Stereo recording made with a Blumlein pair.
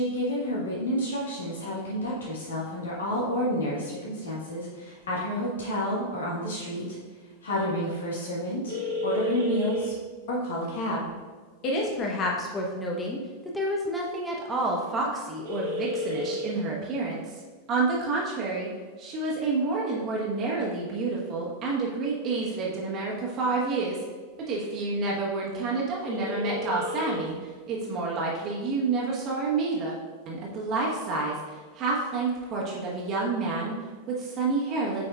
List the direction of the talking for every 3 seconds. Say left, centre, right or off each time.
left, left, left, left, centre, right, right, right, right, right, right, right.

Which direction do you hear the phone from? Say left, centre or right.
right.